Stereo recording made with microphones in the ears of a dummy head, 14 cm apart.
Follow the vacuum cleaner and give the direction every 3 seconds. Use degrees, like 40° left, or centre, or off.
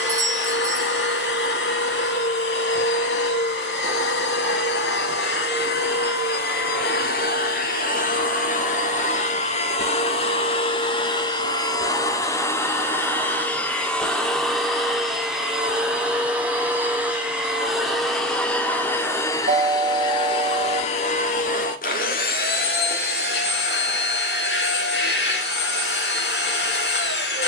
80° left, 80° left, 60° left, 40° left, 10° left, 10° right, 20° left, 60° left, 80° left.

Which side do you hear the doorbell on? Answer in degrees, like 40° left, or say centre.
50° right.